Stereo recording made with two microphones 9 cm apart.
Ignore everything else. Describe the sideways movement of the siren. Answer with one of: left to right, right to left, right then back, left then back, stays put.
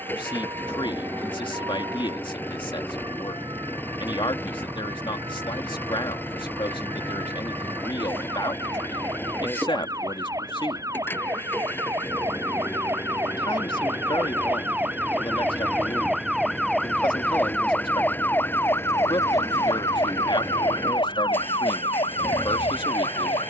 right to left.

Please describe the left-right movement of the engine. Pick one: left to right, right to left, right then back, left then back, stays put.
stays put.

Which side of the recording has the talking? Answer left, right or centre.
left.